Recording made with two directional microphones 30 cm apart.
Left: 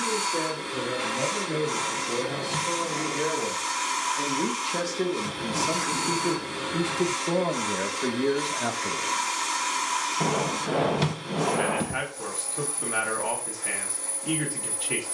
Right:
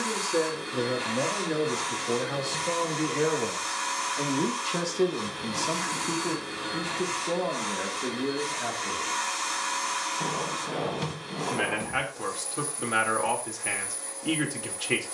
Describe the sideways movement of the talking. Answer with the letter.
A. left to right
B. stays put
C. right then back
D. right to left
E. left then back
E.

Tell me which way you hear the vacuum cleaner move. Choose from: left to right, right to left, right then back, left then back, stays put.
stays put.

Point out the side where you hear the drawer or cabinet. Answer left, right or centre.
left.